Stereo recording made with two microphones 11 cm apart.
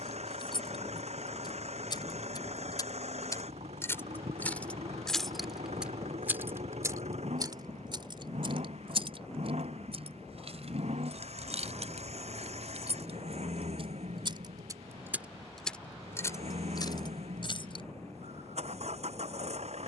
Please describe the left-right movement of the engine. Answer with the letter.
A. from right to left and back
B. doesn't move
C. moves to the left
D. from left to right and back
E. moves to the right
B.